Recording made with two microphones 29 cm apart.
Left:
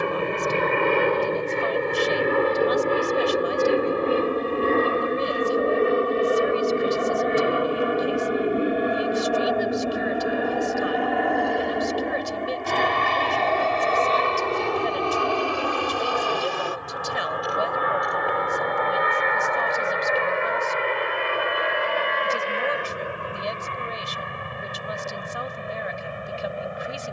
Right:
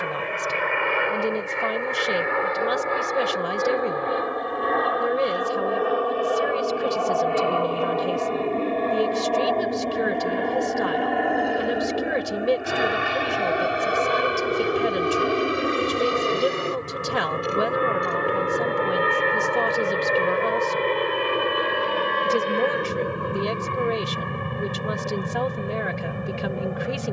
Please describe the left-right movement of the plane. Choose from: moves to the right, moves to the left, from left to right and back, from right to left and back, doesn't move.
moves to the right.